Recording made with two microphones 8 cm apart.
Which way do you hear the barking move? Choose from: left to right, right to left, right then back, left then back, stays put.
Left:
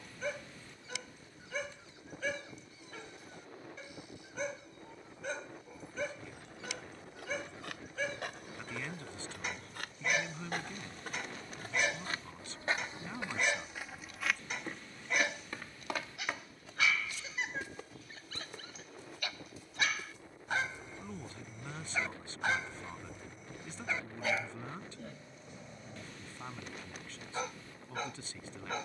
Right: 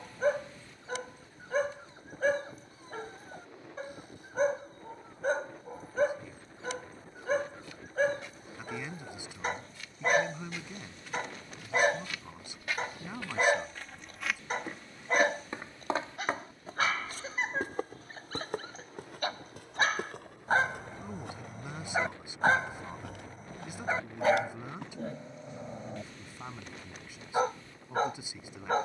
stays put.